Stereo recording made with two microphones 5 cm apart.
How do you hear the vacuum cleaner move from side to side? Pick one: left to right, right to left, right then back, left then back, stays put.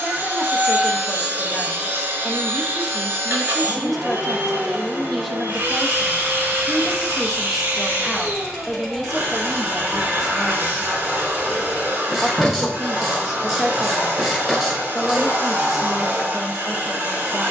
stays put.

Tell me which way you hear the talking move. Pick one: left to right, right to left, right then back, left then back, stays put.
stays put.